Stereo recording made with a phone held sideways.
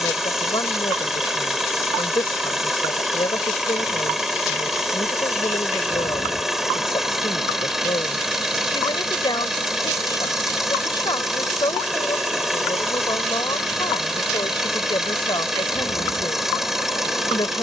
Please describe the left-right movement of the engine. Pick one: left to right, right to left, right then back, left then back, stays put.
stays put.